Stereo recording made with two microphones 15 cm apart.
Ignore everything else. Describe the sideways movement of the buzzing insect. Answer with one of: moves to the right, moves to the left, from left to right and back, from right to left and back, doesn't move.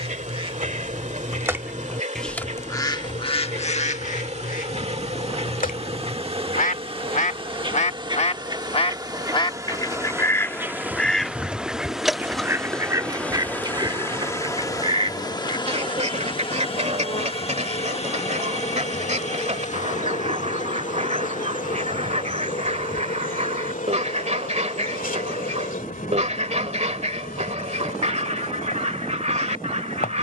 moves to the left.